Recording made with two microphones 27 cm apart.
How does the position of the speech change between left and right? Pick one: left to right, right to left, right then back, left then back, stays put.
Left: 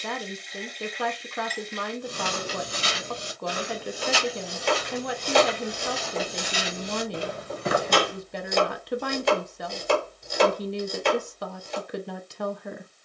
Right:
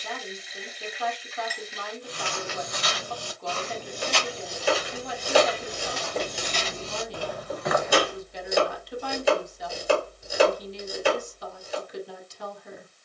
stays put.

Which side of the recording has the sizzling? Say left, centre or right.
centre.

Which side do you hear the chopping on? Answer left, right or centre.
centre.